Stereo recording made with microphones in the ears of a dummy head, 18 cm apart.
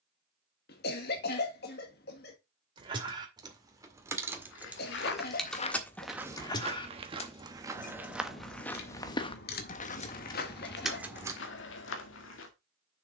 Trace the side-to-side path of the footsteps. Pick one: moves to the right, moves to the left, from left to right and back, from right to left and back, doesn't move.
from left to right and back.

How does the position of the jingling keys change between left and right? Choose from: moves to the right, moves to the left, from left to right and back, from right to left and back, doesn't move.
from right to left and back.